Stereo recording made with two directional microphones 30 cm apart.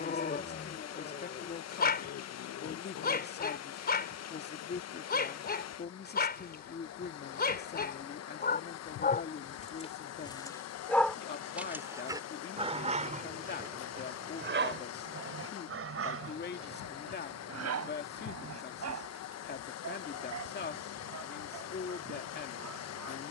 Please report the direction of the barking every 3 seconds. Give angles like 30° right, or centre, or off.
30° left, 30° left, 30° left, 10° left, 30° right, 50° right, 60° right, 70° right.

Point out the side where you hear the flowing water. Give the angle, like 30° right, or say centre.
60° left.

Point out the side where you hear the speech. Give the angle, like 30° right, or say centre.
30° left.